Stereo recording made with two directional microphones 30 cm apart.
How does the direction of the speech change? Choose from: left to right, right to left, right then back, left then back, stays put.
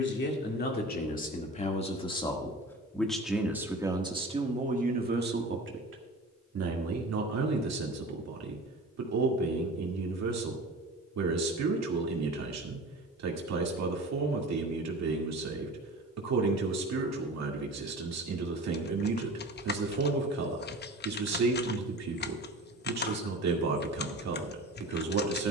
left to right.